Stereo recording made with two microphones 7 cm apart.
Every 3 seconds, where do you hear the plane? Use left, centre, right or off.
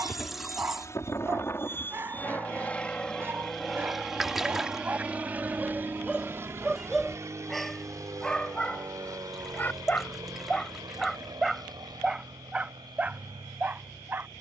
left, centre, right, right, right.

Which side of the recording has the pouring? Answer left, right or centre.
centre.